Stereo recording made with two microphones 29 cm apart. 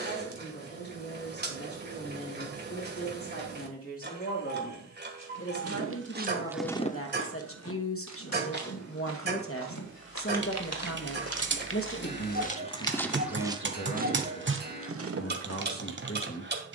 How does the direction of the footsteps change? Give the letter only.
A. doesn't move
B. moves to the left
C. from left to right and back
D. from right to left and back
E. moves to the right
D.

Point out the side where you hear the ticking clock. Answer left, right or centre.
right.